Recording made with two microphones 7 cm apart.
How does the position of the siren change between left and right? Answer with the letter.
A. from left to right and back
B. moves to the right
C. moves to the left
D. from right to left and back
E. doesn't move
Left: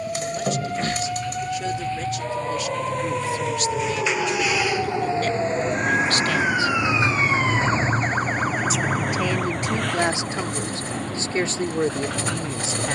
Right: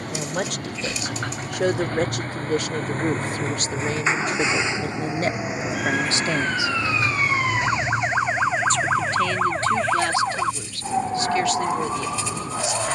B.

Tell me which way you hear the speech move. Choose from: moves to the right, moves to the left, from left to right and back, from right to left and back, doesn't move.
moves to the left.